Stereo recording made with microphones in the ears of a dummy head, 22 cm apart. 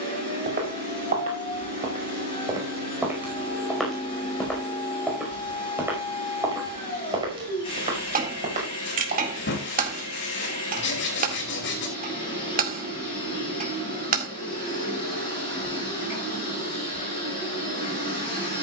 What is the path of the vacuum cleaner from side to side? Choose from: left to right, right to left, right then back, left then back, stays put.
stays put.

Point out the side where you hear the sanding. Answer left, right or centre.
left.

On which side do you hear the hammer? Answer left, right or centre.
right.